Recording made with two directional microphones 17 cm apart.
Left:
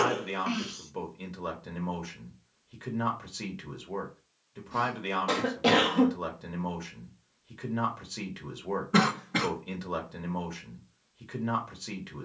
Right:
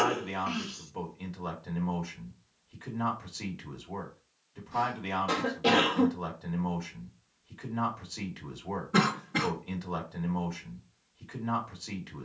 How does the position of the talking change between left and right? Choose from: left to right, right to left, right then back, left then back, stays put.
stays put.